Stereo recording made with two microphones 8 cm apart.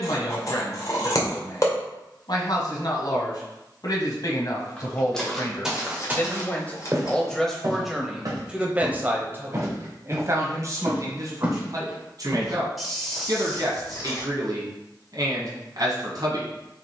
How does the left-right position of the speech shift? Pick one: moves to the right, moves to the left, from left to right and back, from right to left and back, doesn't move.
moves to the right.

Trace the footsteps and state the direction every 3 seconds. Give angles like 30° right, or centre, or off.
off, centre, 40° right, 30° right, centre, off.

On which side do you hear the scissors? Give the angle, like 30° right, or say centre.
50° left.